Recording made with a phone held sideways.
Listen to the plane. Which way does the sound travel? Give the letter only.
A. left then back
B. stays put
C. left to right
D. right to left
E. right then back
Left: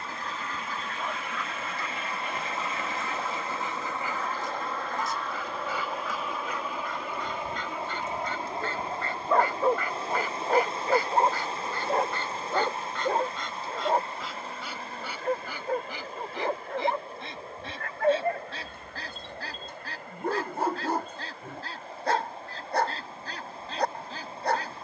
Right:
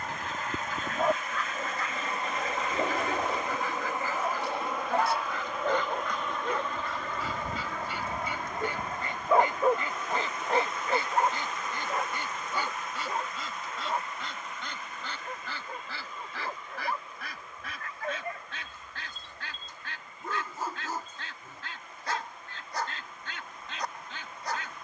D.